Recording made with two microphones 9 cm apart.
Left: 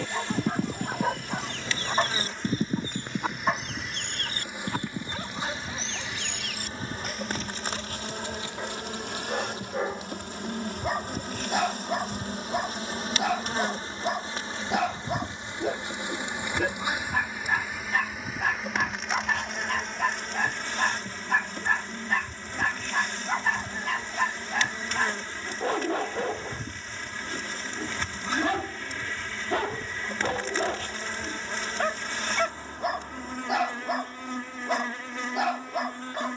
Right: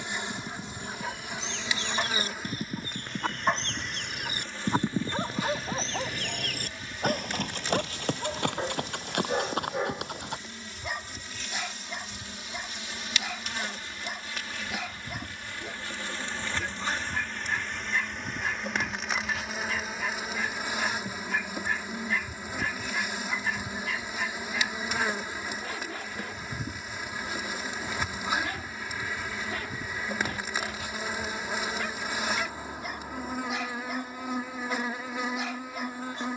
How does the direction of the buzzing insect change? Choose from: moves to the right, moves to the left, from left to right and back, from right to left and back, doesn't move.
from right to left and back.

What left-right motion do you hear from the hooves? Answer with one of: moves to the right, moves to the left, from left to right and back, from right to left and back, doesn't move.
moves to the right.